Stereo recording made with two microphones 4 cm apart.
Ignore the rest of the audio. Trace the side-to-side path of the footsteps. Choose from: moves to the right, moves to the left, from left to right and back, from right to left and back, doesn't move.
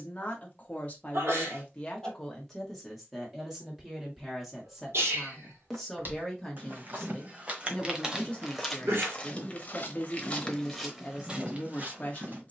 from right to left and back.